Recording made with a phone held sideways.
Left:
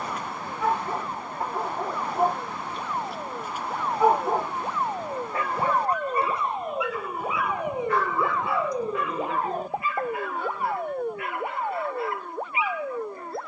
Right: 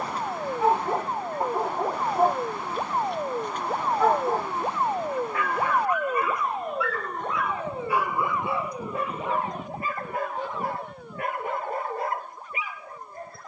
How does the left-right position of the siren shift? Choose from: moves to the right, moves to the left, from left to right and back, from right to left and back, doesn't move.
moves to the left.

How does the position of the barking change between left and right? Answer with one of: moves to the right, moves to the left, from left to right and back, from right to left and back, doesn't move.
from right to left and back.